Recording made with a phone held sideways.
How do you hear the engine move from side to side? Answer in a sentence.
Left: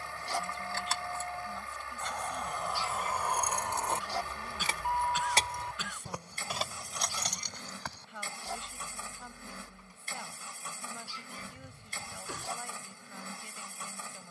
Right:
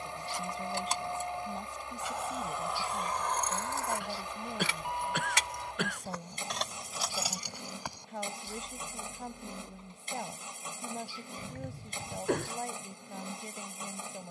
You can hear the engine stay put.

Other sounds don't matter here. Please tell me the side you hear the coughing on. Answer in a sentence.
In this clip you hear the coughing on the right.